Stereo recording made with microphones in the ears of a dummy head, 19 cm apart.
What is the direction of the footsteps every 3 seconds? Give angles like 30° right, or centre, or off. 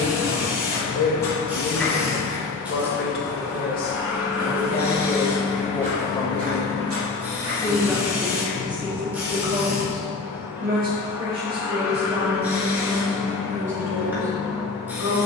10° left, 40° right, 70° right, off, off.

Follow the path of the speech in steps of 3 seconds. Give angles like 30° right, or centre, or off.
60° left, 40° left, 10° right, 40° right, 60° right.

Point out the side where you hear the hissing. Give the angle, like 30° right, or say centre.
10° right.